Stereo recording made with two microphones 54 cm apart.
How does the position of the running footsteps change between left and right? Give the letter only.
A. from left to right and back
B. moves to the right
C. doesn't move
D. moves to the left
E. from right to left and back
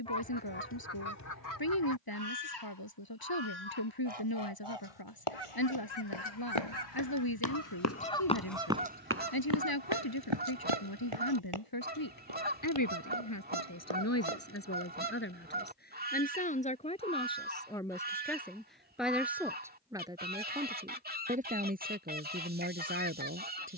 B.